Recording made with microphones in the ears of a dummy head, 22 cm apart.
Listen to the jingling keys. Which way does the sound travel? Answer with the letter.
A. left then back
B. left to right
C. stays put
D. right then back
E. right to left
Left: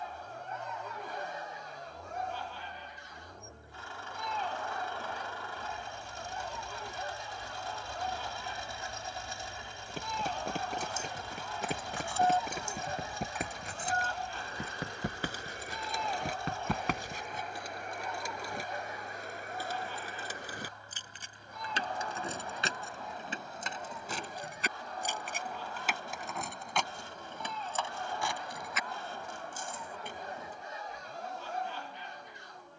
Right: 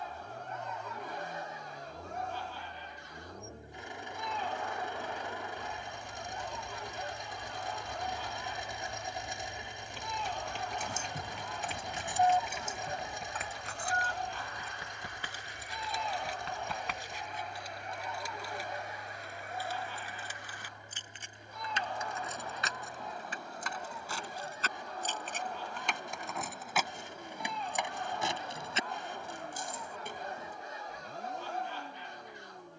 A.